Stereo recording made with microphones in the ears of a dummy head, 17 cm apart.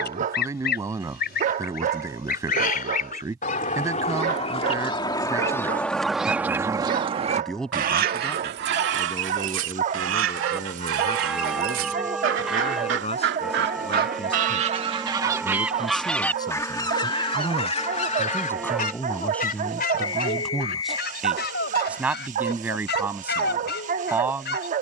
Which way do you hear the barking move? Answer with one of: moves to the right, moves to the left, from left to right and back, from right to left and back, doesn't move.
doesn't move.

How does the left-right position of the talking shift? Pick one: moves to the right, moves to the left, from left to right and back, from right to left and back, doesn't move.
from right to left and back.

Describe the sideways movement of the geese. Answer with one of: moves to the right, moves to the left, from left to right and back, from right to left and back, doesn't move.
from left to right and back.